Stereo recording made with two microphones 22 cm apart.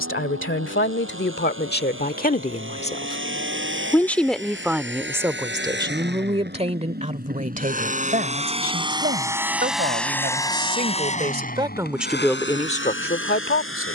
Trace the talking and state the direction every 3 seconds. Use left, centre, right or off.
left, centre, right, right, left.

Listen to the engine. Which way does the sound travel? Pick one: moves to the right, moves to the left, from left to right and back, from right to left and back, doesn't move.
moves to the left.